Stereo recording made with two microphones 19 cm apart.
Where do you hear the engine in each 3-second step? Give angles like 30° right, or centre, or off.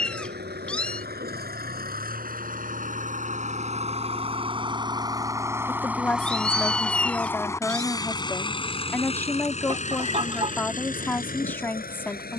50° right, 30° right, 10° left, 40° left.